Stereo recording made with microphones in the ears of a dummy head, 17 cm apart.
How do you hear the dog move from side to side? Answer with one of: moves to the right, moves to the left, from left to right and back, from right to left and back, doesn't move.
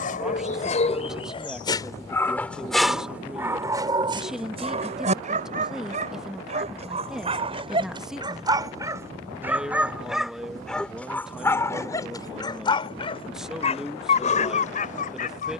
from left to right and back.